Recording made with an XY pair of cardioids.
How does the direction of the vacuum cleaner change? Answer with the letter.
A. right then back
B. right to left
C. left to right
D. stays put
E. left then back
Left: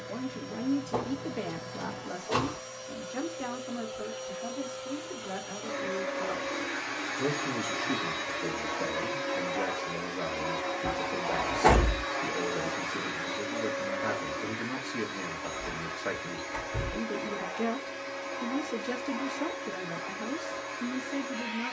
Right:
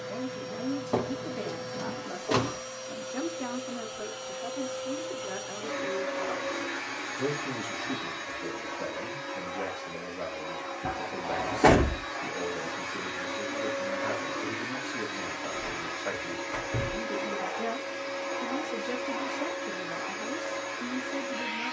E.